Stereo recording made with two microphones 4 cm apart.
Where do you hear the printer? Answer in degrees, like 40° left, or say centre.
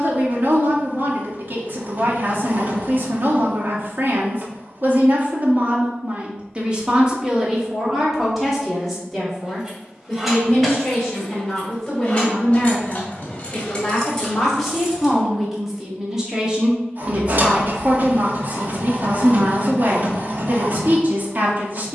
40° right.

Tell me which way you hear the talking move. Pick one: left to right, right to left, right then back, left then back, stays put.
left then back.